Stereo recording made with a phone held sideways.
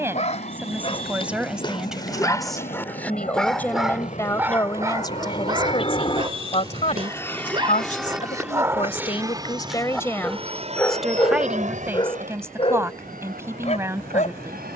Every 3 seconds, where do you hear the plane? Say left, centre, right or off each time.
left, left, centre, right, right.